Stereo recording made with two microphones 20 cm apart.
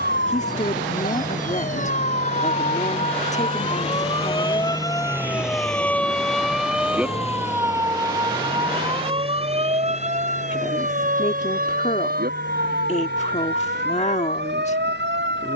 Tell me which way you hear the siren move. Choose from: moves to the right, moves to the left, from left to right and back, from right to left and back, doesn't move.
moves to the right.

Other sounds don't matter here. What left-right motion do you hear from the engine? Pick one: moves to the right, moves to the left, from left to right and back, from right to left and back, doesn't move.
moves to the left.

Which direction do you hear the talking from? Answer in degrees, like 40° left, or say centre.
40° left.